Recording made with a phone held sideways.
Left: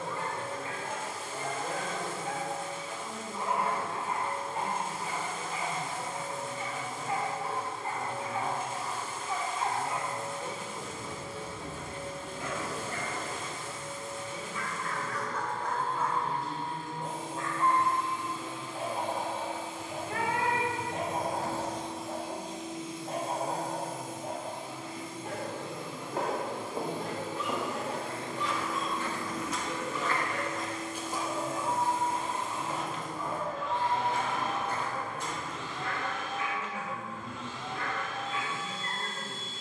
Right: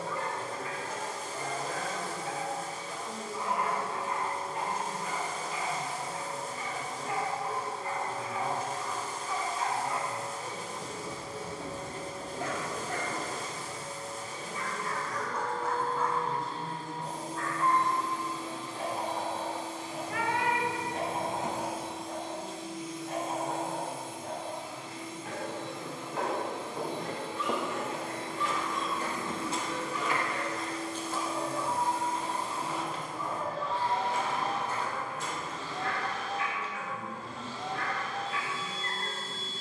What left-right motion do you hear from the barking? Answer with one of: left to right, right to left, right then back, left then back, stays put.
right then back.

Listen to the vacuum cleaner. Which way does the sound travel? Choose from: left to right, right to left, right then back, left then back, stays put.
left then back.